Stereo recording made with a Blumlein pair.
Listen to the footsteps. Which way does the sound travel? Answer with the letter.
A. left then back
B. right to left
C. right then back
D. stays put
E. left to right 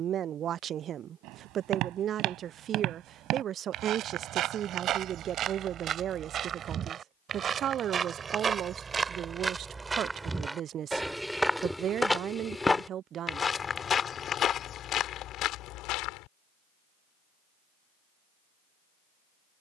B.